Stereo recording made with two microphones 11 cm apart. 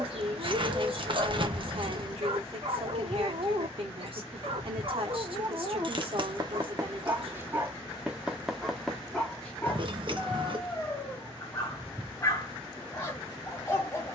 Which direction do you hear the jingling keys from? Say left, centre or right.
right.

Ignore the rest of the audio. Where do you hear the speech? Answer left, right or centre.
right.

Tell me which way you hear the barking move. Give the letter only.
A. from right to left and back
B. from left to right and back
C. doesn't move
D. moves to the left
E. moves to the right
D.